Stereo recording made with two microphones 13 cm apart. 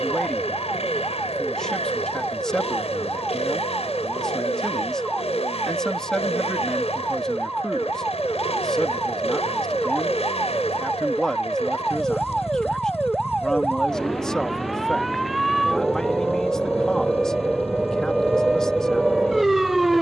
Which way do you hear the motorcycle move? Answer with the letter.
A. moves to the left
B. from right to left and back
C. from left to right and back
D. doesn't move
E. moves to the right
D.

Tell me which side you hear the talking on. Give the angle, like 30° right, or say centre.
10° left.